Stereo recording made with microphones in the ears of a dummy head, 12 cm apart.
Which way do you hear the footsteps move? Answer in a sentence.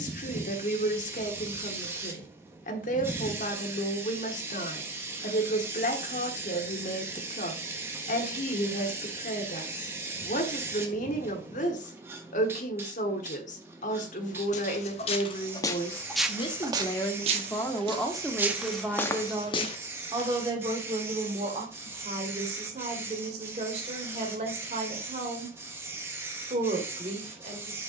In this clip you hear the footsteps move from left to right and back again.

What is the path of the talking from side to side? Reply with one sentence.
In this clip you hear the talking move to the right.